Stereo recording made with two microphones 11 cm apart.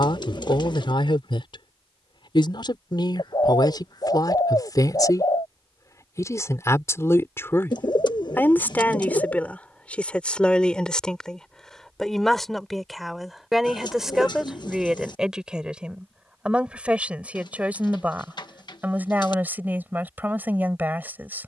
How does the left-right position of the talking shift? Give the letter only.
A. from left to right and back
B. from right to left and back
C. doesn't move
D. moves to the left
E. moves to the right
E.